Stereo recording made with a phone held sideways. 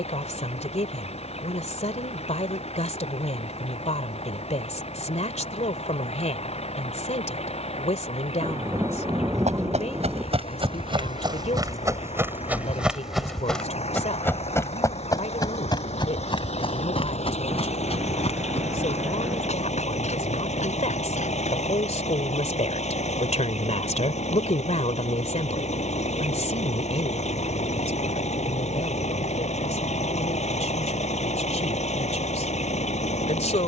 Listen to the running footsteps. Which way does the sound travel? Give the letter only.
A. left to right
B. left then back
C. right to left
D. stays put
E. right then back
C.